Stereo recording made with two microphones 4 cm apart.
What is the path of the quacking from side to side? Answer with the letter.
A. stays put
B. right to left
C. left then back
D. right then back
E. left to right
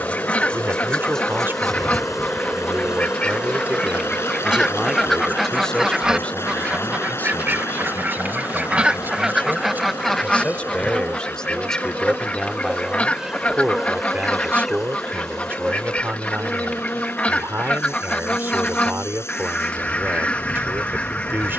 D.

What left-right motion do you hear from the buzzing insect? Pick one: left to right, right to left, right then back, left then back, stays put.
right then back.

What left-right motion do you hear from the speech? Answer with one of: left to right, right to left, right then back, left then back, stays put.
left then back.